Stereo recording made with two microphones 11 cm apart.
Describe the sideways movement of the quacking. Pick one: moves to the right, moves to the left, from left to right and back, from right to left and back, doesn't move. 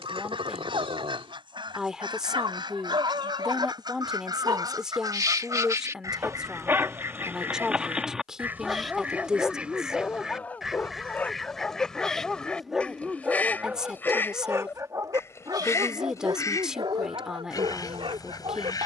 moves to the left.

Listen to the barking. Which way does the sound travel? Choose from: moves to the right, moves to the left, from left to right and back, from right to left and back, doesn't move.
from right to left and back.